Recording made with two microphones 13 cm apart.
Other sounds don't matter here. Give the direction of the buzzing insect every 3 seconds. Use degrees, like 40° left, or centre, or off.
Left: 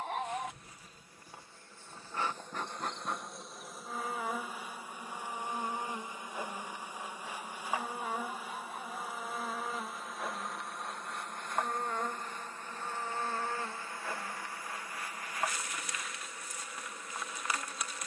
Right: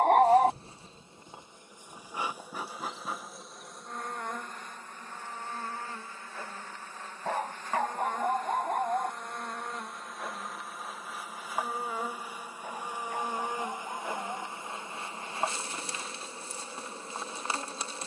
20° right, 10° left, 10° left, centre, 20° right, 30° right.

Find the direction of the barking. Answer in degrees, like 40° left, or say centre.
70° right.